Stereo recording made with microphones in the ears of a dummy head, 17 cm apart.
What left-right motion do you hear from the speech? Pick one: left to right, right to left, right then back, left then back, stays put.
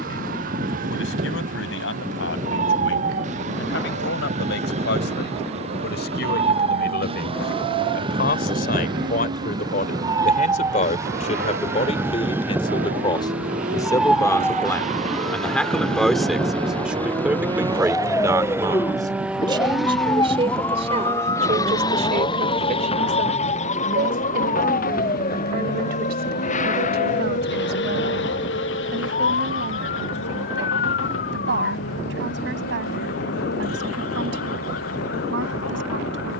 left to right.